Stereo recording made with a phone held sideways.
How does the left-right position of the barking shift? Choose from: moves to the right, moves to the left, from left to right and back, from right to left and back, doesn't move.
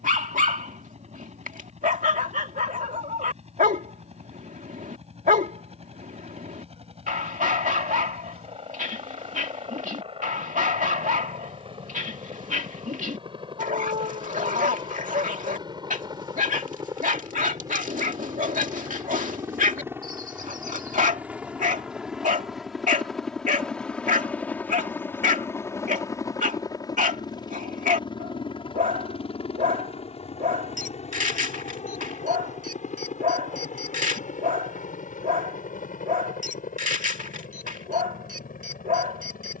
doesn't move.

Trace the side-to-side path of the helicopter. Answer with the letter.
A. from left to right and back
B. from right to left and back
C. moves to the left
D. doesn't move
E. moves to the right
C.